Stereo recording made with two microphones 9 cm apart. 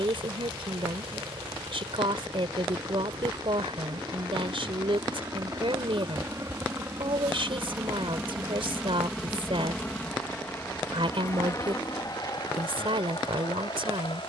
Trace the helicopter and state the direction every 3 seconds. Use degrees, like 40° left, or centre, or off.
60° right, 40° right, 20° right, 20° left, 50° left.